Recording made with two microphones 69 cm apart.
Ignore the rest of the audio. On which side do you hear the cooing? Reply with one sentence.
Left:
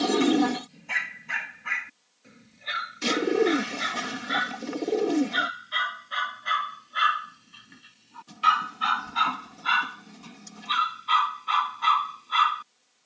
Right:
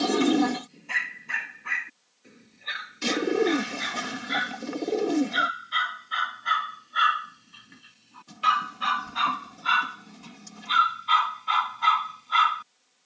In this clip you hear the cooing in the centre.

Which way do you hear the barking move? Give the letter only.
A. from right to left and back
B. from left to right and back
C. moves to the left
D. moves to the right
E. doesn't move
D.